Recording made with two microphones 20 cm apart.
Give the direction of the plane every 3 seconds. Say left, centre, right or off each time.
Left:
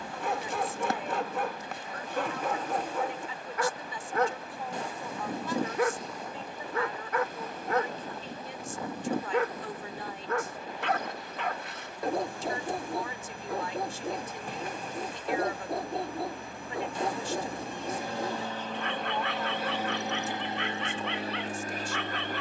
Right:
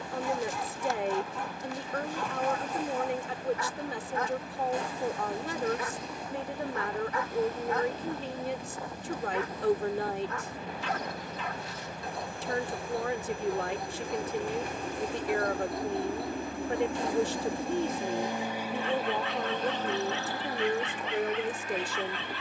right, right, right, right, right, right, centre, left.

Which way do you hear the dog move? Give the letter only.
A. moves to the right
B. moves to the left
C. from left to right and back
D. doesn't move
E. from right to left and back
D.